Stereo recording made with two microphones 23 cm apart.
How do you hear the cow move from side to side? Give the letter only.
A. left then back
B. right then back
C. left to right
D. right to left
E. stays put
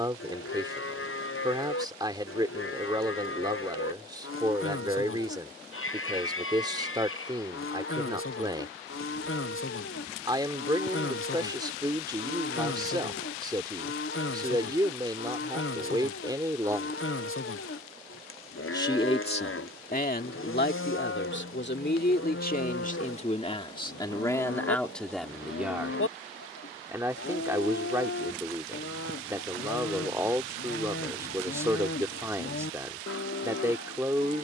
E.